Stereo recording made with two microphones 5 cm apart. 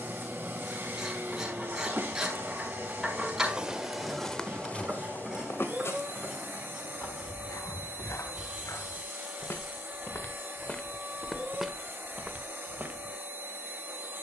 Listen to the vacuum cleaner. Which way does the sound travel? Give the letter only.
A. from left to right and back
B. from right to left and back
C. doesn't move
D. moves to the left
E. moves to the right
C.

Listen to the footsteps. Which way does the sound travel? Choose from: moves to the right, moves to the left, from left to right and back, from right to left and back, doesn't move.
from right to left and back.